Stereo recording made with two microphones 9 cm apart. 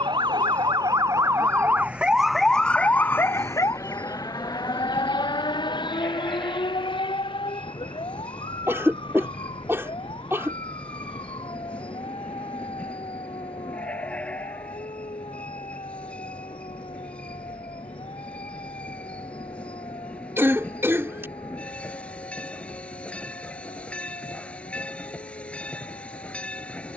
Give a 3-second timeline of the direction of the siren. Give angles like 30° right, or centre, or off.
20° right, 40° left, 60° left, 70° left, 70° left, 70° left, 80° left, 80° left, 80° left.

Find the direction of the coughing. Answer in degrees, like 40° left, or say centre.
30° right.